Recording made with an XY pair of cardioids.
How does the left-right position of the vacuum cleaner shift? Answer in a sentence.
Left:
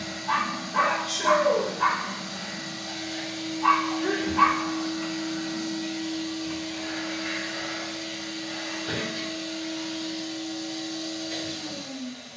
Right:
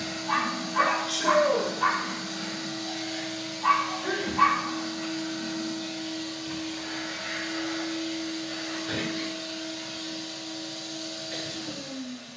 You can hear the vacuum cleaner go from the right side to the left.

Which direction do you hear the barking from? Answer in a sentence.
In this clip you hear the barking on the left.